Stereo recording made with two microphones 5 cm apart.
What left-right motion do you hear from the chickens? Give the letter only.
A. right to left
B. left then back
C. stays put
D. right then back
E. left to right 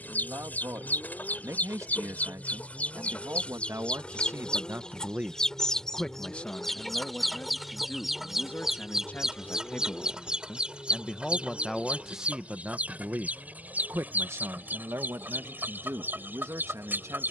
E.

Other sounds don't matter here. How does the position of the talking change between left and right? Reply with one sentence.
In this clip you hear the talking go left and come back.